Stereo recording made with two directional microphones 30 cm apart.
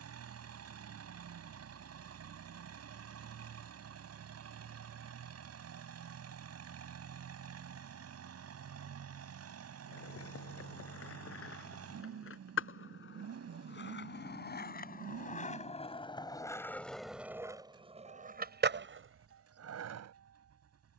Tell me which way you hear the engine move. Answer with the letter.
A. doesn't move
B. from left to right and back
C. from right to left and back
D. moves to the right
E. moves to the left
A.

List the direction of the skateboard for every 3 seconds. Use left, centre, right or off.
off, off, off, left, left, centre, right.